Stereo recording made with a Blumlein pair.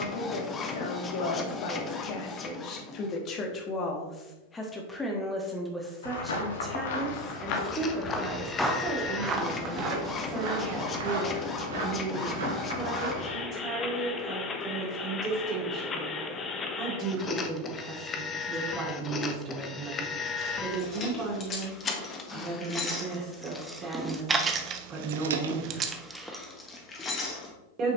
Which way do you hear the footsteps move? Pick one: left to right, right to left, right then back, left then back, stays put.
left to right.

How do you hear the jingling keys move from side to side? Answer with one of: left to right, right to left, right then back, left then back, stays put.
right then back.